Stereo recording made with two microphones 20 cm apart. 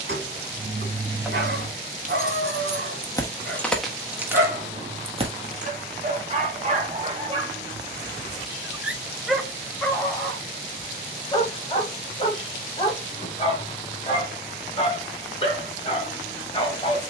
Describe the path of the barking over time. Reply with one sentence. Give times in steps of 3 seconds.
In this clip you hear the barking on the right from 0 s, in the centre from 9 s and on the left from 12 s.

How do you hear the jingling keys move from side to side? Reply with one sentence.
In this clip you hear the jingling keys go left and come back.